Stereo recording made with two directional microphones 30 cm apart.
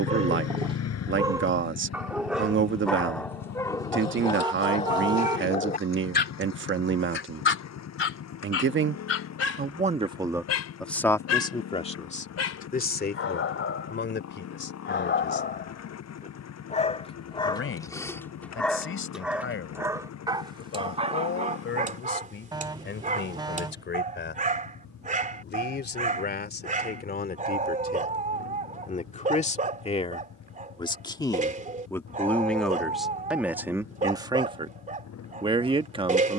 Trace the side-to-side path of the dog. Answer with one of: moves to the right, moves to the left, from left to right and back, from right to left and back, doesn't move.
from right to left and back.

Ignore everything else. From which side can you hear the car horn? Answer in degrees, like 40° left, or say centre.
10° right.